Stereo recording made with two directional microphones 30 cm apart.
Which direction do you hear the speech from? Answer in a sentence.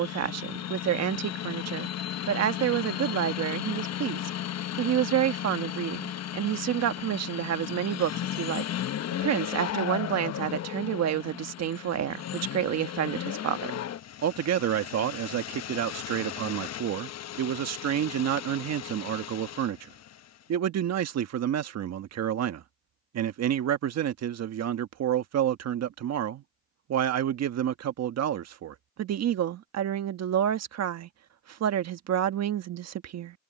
You can hear the speech on the right.